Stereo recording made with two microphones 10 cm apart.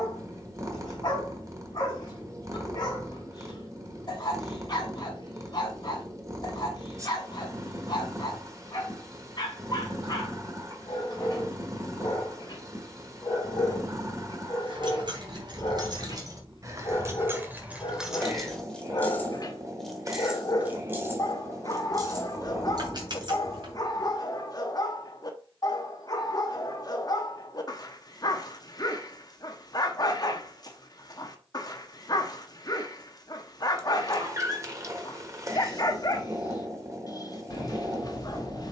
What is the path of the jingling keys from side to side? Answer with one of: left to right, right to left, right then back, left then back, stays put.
left then back.